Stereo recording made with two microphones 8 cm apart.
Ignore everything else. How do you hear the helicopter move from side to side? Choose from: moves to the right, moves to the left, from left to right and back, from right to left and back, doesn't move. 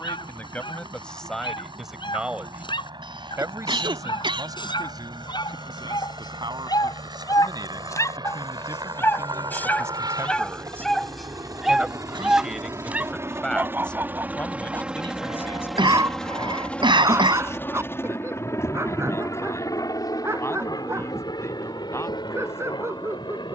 moves to the left.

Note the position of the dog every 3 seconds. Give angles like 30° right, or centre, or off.
80° left, 70° left, 50° left, 10° left, 20° right, 30° right, 30° right, 30° right.